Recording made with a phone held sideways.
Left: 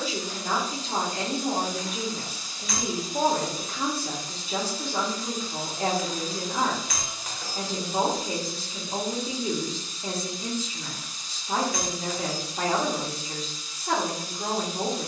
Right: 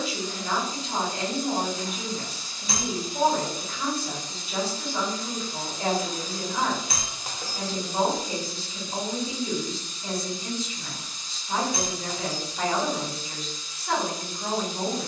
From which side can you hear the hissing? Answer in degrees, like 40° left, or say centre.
10° left.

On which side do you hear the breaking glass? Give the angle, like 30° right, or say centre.
30° right.